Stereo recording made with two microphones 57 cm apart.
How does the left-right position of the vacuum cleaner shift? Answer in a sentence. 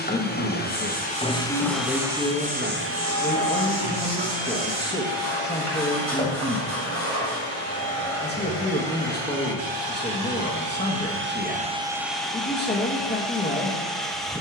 In this clip you hear the vacuum cleaner go right and come back.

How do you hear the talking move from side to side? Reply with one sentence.
In this clip you hear the talking stay put.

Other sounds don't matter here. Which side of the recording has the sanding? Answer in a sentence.
You can hear the sanding on the left.